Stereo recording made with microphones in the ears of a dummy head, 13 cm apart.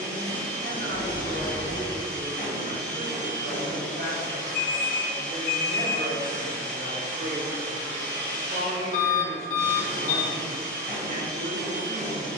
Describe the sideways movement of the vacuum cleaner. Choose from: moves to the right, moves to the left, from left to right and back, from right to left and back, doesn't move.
doesn't move.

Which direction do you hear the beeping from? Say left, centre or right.
left.